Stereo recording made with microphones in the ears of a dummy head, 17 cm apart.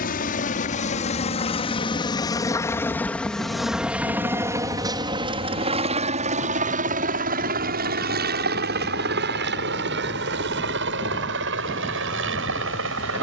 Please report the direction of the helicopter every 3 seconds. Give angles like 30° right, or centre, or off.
30° left, 10° right, 40° right, 60° right, 60° right.